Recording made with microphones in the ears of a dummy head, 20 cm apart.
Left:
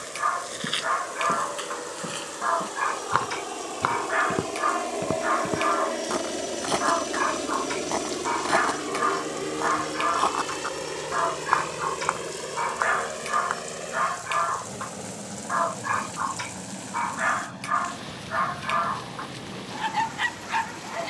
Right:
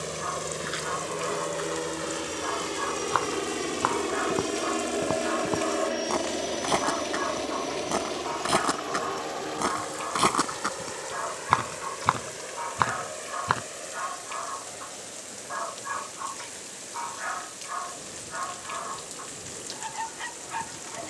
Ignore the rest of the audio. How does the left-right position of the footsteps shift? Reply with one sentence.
You can hear the footsteps travel towards the right.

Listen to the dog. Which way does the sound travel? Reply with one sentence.
In this clip you hear the dog stay put.